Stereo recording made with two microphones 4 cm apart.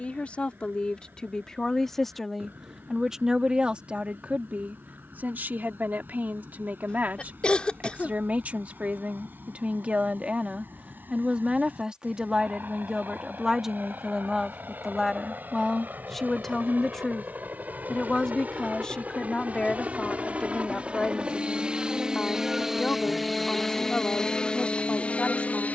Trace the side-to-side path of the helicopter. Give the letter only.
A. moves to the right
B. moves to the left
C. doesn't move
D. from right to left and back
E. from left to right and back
B.